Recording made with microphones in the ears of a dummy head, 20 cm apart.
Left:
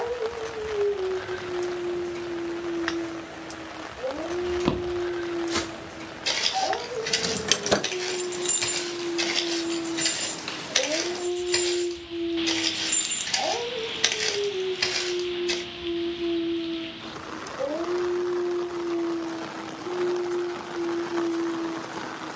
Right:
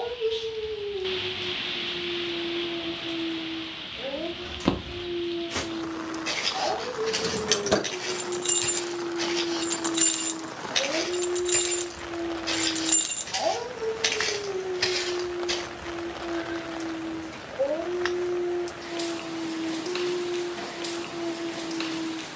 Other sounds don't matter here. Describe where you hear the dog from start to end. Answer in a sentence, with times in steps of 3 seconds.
You can hear the dog on the left from 0 s and in the centre from 12 s.